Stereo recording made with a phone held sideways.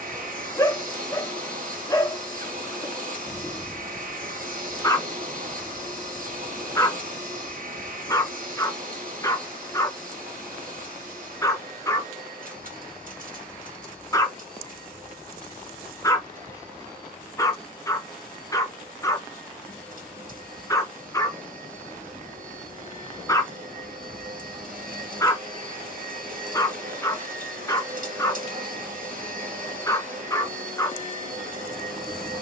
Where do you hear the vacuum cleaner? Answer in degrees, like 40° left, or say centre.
60° right.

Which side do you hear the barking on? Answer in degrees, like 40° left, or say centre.
20° left.